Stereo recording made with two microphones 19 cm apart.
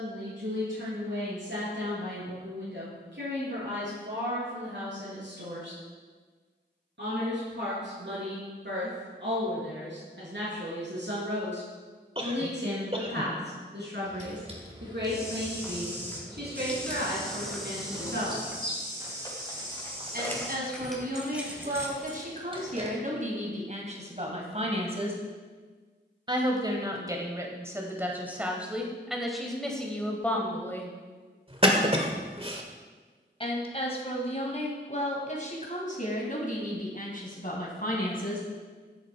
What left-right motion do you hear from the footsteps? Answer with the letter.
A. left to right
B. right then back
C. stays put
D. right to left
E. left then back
A.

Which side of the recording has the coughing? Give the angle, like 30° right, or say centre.
30° right.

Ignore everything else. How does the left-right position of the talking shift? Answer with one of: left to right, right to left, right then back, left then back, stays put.
right to left.